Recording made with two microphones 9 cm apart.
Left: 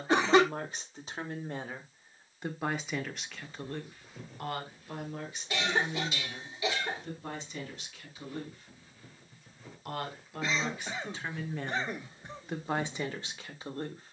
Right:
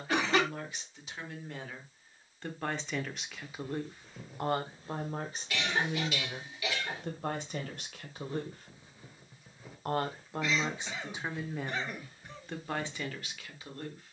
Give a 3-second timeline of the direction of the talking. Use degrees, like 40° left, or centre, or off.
30° left, 30° right, 60° right, 20° right, 20° left.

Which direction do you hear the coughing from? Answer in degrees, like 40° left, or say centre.
30° left.